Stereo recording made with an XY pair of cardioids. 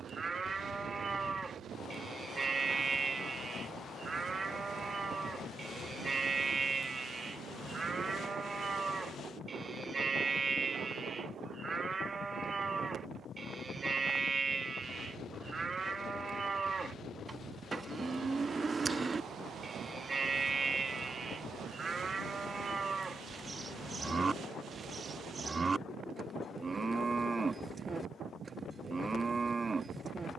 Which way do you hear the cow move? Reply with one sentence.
You can hear the cow stay in one place.